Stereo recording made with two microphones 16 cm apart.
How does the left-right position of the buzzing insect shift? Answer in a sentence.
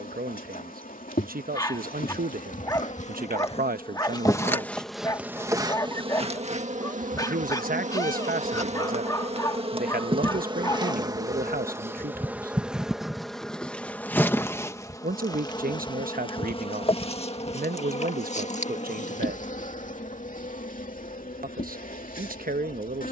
In this clip you hear the buzzing insect move from left to right and back again.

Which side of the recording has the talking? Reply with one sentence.
You can hear the talking on the right.